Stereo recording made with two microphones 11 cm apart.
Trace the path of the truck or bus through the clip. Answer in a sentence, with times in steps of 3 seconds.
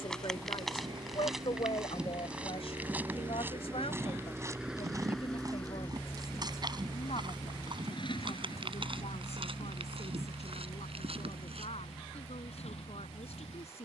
You can hear the truck or bus on the right from 0 s, in the centre from 3 s and on the left from 6 s.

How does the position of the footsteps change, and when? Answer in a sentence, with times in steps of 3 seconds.
You can hear the footsteps in the centre from 0 s, on the right from 3 s and not at all from 12 s.